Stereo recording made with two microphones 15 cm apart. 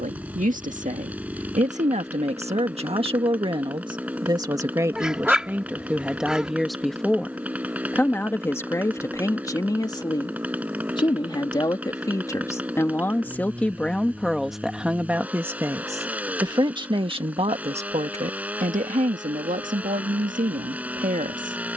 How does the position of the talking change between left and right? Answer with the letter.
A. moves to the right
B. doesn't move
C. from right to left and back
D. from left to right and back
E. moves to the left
C.